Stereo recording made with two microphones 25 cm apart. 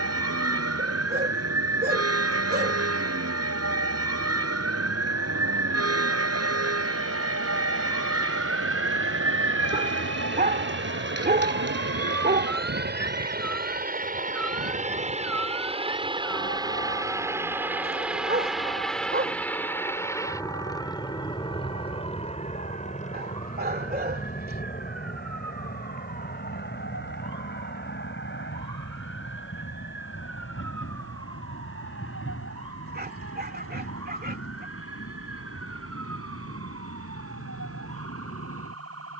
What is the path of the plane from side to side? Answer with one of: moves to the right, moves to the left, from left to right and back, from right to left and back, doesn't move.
moves to the left.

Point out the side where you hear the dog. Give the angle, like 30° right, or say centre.
40° right.